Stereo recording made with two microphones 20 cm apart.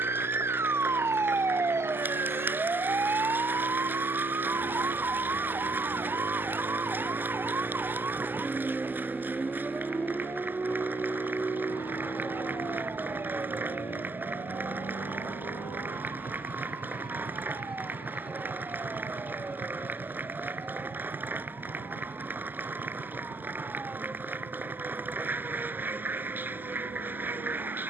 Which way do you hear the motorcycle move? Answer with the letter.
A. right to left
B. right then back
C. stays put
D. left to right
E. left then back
A.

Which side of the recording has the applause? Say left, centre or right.
centre.